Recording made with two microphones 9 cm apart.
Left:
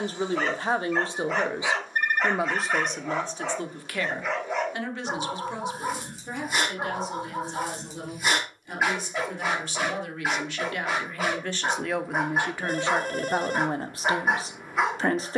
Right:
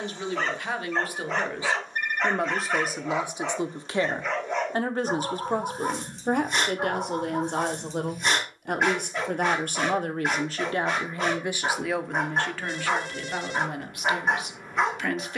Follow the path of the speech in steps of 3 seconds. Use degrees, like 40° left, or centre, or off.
20° left, 30° right, 60° right, 30° right, 30° left.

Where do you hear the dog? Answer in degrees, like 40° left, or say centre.
centre.